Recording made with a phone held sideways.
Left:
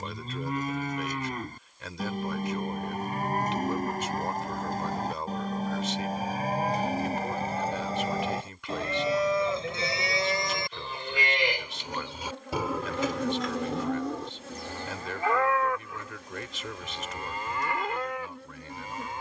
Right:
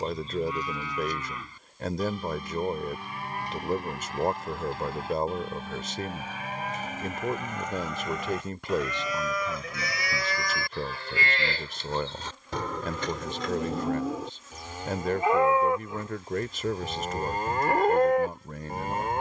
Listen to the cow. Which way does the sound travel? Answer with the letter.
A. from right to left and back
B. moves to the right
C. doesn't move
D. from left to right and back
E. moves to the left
B.